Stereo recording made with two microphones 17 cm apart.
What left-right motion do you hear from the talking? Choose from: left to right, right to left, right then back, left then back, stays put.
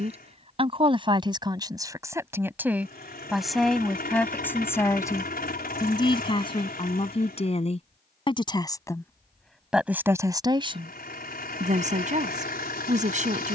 left then back.